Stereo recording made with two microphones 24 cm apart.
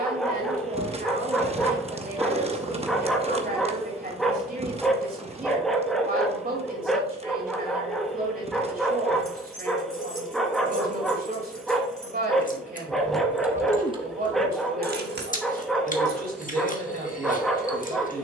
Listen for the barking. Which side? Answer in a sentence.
In this clip you hear the barking in the centre.